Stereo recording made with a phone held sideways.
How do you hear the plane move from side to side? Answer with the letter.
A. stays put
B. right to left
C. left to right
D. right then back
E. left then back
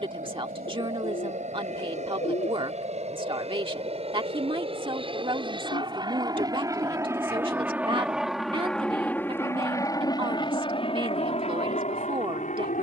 B.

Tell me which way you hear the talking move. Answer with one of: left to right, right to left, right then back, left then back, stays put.
stays put.